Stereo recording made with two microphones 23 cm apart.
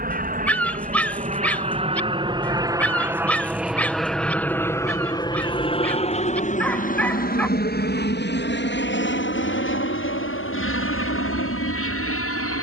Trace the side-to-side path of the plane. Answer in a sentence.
You can hear the plane move to the left.